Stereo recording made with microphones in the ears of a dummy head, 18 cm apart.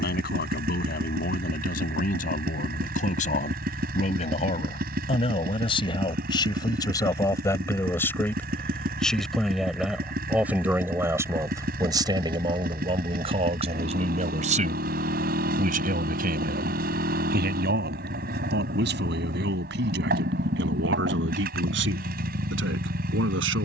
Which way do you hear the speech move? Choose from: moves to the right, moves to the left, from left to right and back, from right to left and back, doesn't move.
moves to the right.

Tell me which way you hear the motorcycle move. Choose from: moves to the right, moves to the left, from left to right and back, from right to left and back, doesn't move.
doesn't move.